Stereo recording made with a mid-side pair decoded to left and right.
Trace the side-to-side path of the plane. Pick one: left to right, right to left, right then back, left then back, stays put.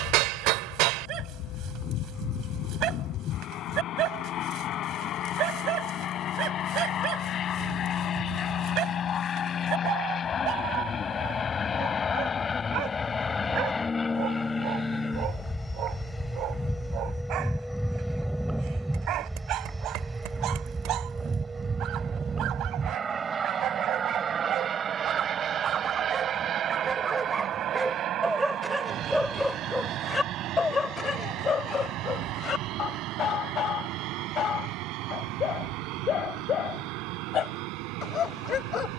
left to right.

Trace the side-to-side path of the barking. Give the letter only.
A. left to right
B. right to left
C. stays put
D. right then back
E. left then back
B.